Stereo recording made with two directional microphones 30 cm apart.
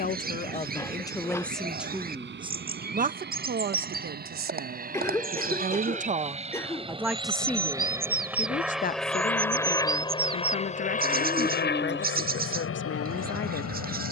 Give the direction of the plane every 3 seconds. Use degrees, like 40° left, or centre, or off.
50° right, 40° right, 10° right, 20° left, 50° left.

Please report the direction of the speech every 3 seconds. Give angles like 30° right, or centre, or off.
10° left, 40° right, centre, 40° left, 40° left.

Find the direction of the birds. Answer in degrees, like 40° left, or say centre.
30° right.